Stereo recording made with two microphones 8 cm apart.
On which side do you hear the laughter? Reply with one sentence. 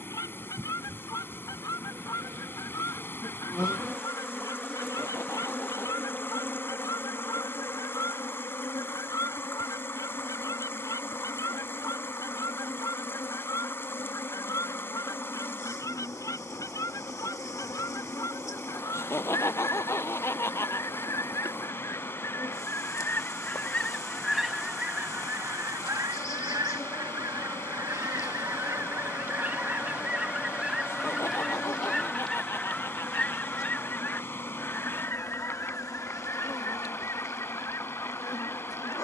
In this clip you hear the laughter on the left.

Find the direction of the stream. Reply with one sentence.
You can hear the stream on the left.